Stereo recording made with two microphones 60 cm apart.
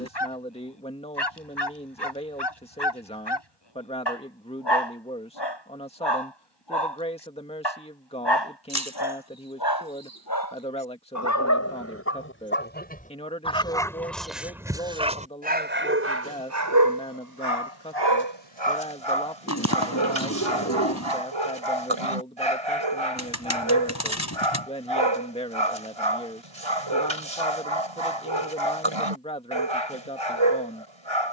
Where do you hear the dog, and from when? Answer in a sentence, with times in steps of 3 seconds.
In this clip you hear the dog on the left from 0 s, in the centre from 12 s and on the right from 15 s.